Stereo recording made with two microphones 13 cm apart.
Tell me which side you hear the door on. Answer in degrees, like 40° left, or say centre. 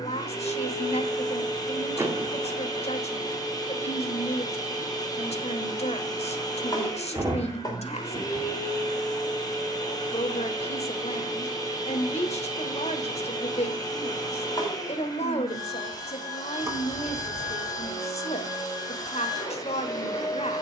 20° right.